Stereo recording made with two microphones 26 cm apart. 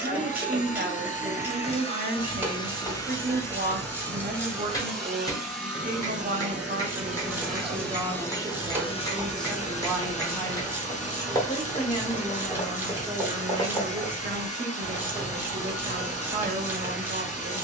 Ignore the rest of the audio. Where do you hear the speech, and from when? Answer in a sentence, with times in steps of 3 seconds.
In this clip you hear the speech on the right from 0 s, in the centre from 9 s and on the right from 15 s.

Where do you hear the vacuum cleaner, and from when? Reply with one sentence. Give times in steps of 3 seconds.
In this clip you hear the vacuum cleaner on the left from 0 s, in the centre from 3 s and on the left from 9 s.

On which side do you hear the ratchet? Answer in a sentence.
You can hear the ratchet in the centre.